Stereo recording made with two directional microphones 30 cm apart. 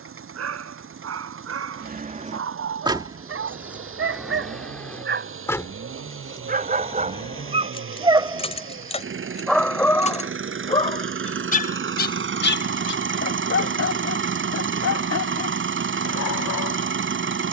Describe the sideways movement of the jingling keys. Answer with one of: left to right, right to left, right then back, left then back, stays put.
right to left.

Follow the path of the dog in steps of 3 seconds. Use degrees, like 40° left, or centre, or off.
50° right, 40° right, 20° right, 10° left, 50° left, 60° left.